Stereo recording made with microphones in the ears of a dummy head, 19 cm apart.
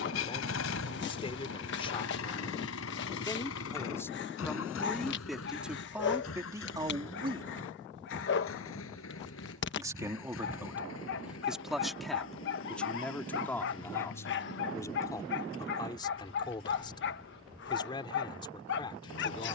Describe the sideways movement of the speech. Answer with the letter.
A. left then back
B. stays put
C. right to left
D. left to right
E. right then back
E.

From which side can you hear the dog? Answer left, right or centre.
left.